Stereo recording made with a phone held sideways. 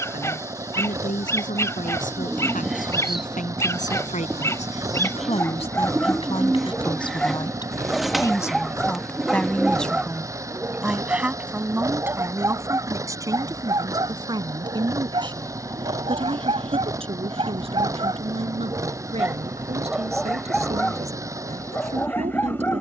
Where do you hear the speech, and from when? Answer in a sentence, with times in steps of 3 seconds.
In this clip you hear the speech on the left from 0 s, in the centre from 9 s and on the right from 12 s.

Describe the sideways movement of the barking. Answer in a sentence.
You can hear the barking move from left to right and back again.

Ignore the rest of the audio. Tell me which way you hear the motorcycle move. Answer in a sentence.
You can hear the motorcycle stay put.